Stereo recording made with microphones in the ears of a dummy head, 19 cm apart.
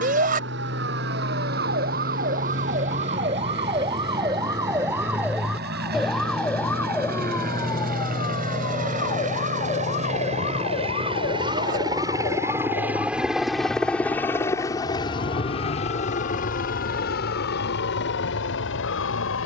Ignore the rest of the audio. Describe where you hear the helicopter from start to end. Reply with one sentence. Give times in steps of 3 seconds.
You can hear the helicopter on the right from 0 s, in the centre from 12 s and on the left from 15 s.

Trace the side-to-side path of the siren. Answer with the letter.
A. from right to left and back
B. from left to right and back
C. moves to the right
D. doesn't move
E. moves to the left
E.